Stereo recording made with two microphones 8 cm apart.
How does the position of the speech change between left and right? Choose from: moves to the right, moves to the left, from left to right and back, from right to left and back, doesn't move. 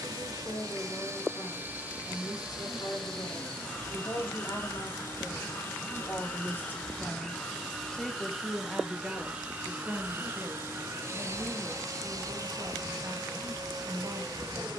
moves to the right.